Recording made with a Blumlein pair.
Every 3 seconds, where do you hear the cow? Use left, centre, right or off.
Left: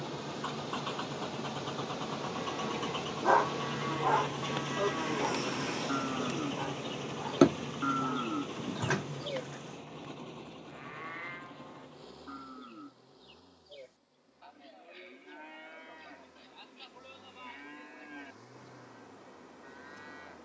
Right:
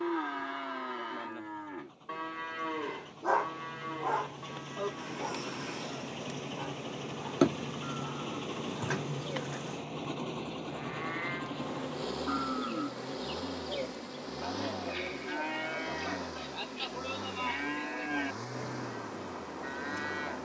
right, centre, left, centre, right, right, right.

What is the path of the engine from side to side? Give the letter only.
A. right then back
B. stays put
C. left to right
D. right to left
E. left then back
C.